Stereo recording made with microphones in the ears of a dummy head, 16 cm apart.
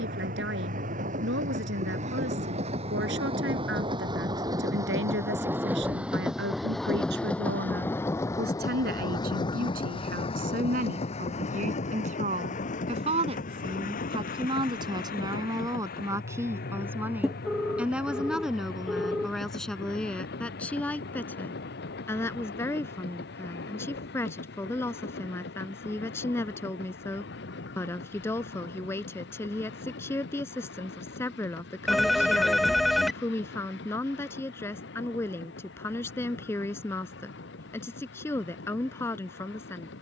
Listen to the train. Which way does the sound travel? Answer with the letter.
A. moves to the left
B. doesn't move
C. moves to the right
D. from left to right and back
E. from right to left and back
A.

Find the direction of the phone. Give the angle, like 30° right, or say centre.
centre.